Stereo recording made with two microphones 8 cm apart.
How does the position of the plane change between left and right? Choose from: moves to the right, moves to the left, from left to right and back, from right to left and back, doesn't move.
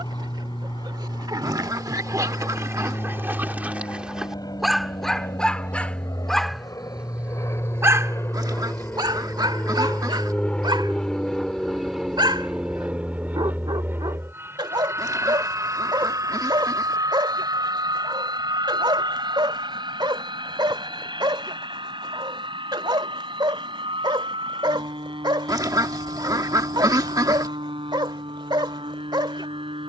moves to the right.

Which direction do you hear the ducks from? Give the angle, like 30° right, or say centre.
50° right.